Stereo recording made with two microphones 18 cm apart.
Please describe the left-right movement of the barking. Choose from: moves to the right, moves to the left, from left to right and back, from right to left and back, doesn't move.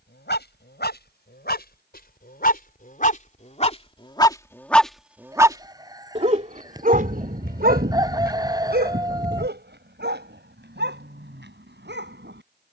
moves to the right.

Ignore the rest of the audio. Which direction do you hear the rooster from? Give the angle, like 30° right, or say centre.
20° right.